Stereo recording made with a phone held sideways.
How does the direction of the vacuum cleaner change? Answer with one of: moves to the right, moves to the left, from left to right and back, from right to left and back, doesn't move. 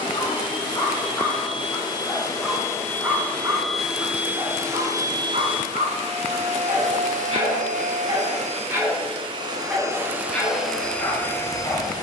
from left to right and back.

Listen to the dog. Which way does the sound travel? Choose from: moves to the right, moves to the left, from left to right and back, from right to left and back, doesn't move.
from left to right and back.